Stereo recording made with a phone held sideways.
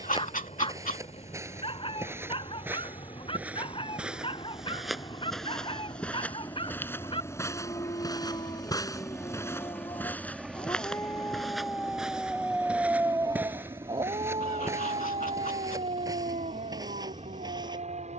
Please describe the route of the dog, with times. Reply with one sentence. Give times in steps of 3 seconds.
In this clip you hear the dog on the left from 0 s and on the right from 12 s.